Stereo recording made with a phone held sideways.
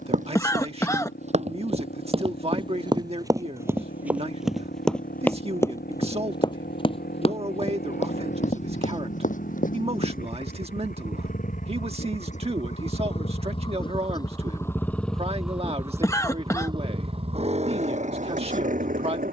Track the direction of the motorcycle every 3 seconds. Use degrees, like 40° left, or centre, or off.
80° left, 80° left, 70° left, 60° left, 30° left, 20° right, 50° right.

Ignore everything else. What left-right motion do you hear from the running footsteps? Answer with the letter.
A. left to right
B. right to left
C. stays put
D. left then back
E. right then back
B.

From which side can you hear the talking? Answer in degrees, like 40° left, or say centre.
40° right.